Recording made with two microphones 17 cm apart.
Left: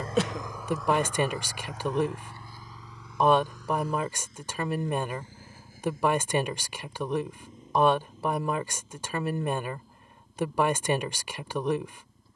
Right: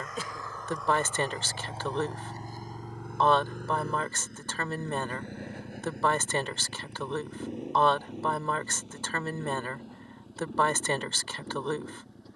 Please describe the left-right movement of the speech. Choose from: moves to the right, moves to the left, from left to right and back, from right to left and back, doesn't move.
doesn't move.